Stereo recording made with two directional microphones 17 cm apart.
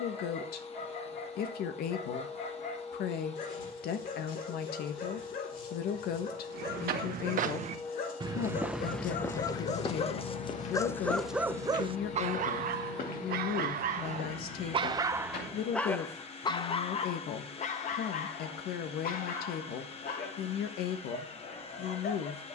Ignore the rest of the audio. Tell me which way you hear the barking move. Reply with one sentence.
In this clip you hear the barking go right and come back.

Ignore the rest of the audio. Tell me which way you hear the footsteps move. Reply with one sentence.
You can hear the footsteps move to the left.